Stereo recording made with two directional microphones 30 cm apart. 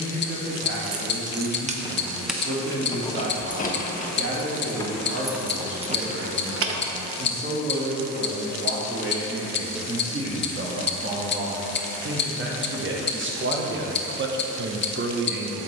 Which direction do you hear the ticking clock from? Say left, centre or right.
left.